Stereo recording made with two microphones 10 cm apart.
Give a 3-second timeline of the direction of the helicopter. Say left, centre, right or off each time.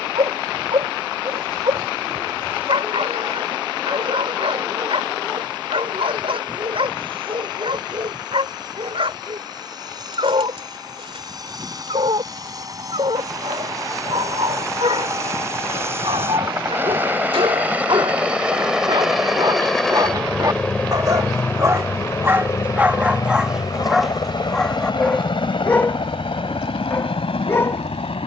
off, right, right, right, right, right, centre, left, left, left.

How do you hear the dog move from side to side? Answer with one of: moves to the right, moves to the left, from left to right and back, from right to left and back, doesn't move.
moves to the left.